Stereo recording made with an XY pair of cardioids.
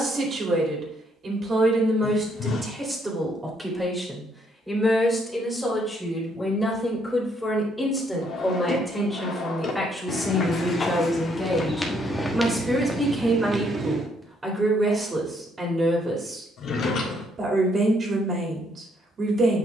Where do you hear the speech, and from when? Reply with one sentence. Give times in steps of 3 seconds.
In this clip you hear the speech on the right from 0 s, in the centre from 3 s and on the right from 15 s.